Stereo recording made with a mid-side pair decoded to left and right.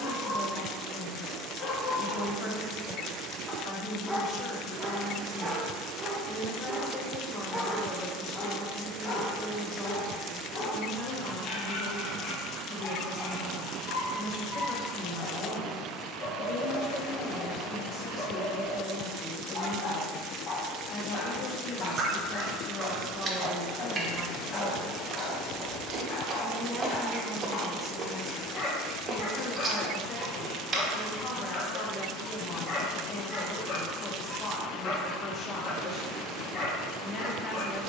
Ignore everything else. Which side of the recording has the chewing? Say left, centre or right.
right.